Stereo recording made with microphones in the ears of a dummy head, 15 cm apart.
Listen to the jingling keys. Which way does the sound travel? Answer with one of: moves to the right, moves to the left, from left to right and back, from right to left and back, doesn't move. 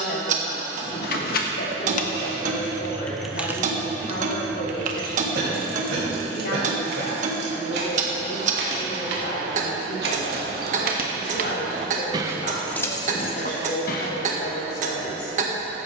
from left to right and back.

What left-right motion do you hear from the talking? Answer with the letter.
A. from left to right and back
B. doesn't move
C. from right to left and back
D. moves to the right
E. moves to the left
B.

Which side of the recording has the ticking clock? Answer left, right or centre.
right.